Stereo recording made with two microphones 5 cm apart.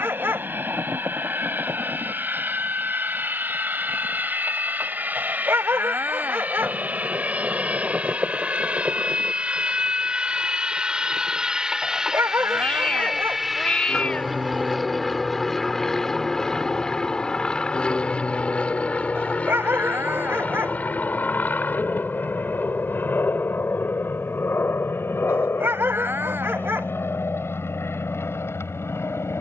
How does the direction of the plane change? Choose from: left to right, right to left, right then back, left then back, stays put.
right to left.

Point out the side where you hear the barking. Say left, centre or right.
right.